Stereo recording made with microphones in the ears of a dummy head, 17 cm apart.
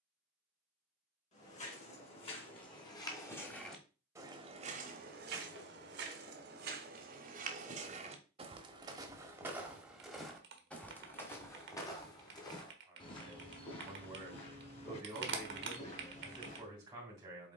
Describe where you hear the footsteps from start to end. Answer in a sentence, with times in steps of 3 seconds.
In this clip you hear the footsteps on the left from 0 s, on the right from 3 s, in the centre from 9 s and on the left from 12 s.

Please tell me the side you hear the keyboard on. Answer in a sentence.
You can hear the keyboard on the right.